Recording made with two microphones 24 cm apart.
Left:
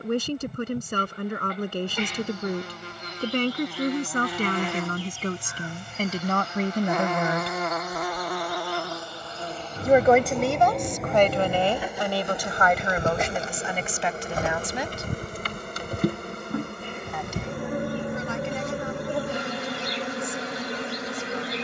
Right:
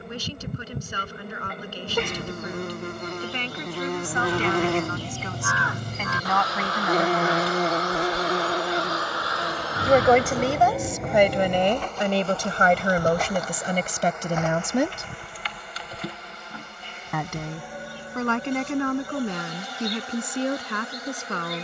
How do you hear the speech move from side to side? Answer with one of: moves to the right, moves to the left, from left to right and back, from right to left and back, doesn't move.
moves to the right.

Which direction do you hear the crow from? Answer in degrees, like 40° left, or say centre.
80° right.